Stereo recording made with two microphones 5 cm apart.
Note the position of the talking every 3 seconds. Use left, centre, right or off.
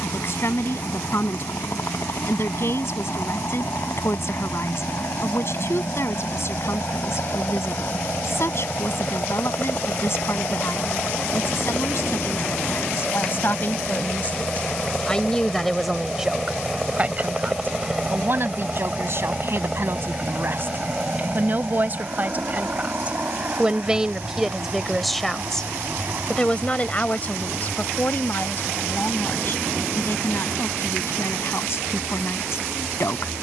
left, left, left, left, left, centre, right, right, centre, left, left.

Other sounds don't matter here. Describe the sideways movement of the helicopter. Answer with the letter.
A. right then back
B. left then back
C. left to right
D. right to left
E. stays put
C.